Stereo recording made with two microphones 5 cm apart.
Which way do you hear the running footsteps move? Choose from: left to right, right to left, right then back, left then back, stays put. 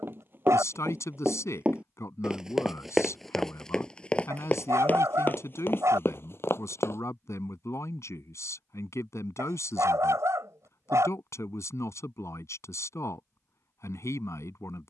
right to left.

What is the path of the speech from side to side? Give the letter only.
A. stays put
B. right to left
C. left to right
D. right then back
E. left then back
A.